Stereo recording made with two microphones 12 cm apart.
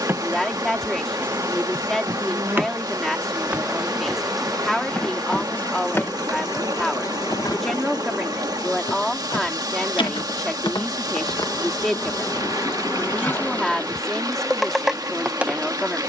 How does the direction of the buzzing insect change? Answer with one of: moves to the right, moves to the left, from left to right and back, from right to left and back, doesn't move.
from right to left and back.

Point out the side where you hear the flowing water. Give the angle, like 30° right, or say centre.
30° right.